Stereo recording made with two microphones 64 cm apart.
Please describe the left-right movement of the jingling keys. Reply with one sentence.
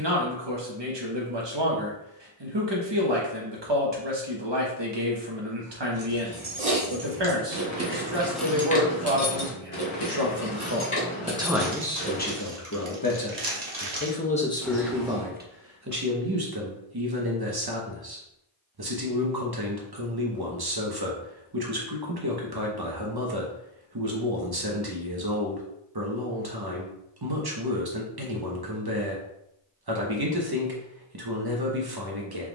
In this clip you hear the jingling keys move to the left.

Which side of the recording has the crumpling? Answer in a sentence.
In this clip you hear the crumpling on the right.